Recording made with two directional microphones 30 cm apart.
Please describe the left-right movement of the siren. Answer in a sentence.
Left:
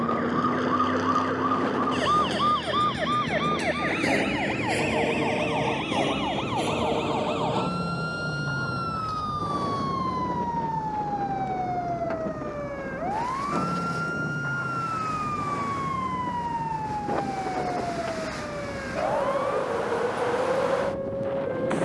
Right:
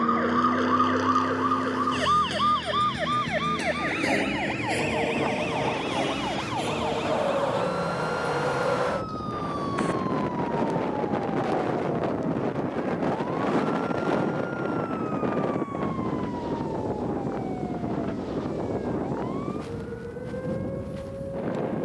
In this clip you hear the siren move to the left.